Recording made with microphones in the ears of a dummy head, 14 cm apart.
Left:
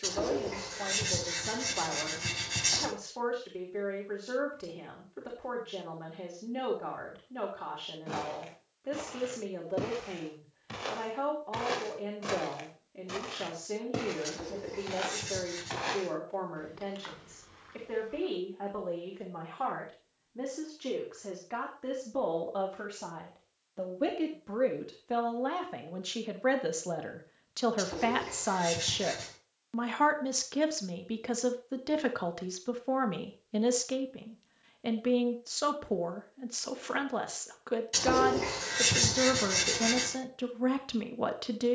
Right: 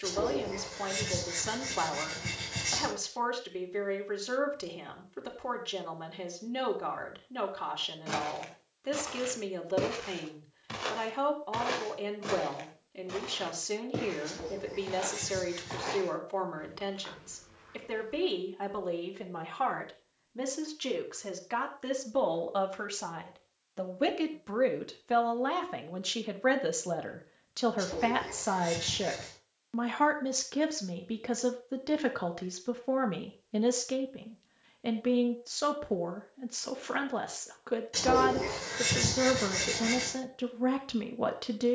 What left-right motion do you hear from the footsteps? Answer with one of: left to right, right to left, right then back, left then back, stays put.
right to left.